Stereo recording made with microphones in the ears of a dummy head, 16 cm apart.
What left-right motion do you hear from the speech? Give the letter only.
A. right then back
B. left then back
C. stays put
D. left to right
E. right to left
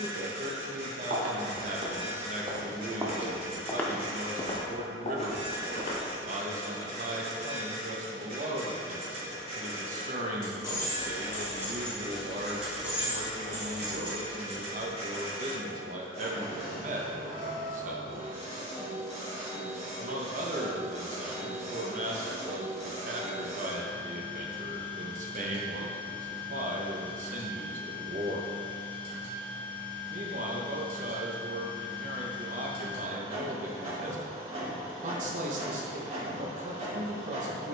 C.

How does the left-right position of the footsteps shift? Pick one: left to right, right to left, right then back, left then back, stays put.
right to left.